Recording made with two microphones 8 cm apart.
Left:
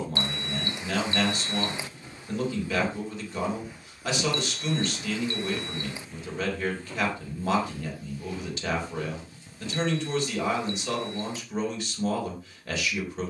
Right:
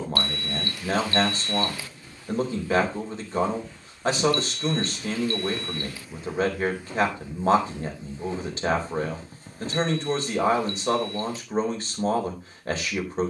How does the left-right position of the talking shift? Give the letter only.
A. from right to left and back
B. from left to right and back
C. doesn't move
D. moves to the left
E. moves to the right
C.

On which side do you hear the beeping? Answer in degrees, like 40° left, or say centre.
20° left.